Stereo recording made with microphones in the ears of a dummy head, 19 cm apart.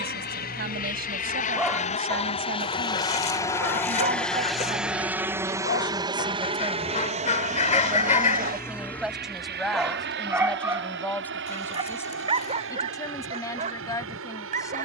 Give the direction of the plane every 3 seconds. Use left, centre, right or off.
left, centre, right, right, right.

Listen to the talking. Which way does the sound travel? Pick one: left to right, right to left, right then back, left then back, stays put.
right to left.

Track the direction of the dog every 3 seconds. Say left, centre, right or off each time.
centre, left, left, centre, right.